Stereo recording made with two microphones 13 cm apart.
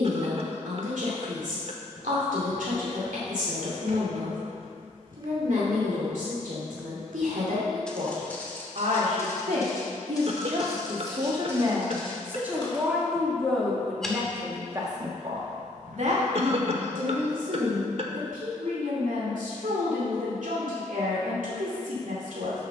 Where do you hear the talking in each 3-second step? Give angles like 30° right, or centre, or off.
80° right, 80° right, 80° right, 50° right, 10° right, 70° right, 80° right, 80° right.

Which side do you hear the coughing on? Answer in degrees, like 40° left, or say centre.
50° right.